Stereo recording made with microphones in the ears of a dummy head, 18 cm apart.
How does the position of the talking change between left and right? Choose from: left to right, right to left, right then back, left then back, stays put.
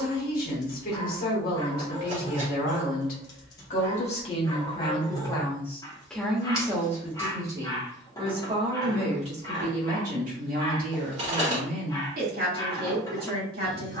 left to right.